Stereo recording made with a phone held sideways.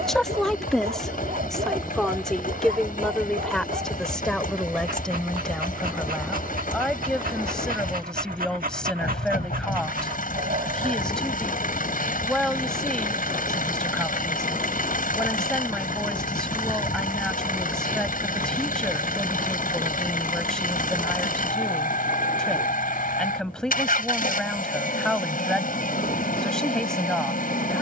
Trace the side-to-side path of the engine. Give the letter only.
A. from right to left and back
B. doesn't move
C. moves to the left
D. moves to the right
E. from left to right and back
B.